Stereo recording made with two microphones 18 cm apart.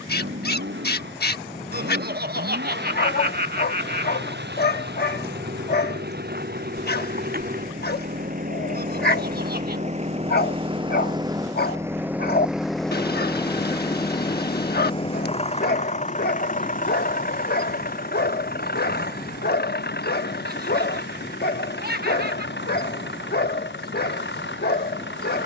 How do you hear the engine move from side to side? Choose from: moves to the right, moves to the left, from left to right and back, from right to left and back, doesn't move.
moves to the left.